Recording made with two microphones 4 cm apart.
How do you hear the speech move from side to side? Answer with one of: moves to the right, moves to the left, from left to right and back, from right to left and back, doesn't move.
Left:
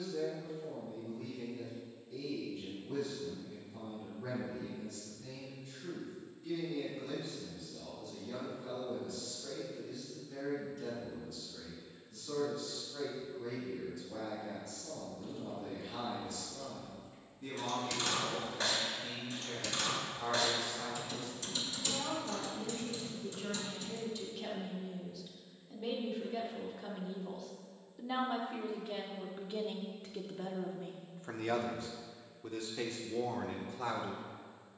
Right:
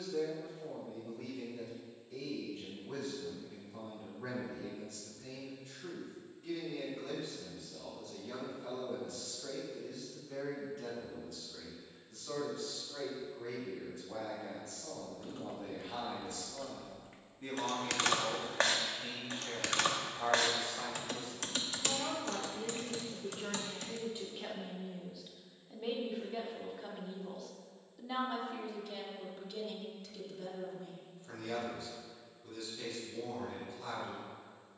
moves to the left.